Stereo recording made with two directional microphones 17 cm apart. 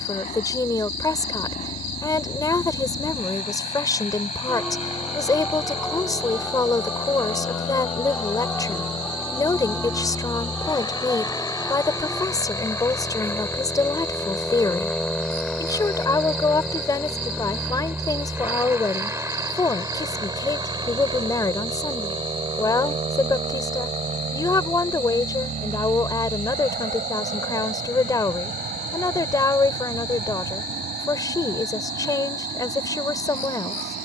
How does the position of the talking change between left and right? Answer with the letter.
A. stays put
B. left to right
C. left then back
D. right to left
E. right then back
A.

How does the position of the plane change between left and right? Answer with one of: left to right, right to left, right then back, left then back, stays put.
left to right.